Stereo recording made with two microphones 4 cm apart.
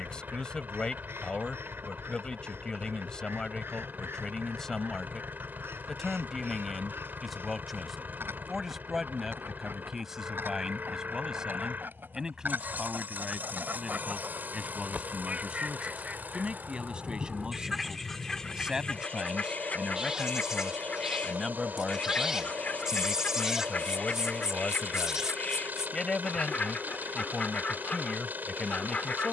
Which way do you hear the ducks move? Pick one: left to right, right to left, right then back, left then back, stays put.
right to left.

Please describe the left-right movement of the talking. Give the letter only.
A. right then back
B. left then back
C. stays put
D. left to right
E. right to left
A.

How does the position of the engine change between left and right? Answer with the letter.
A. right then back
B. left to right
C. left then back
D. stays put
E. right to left
D.